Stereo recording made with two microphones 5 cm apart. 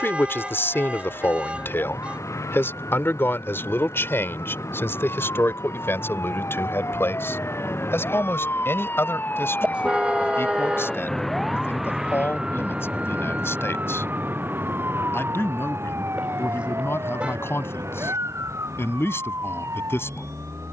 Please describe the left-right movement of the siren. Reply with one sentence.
You can hear the siren go from the left side to the right.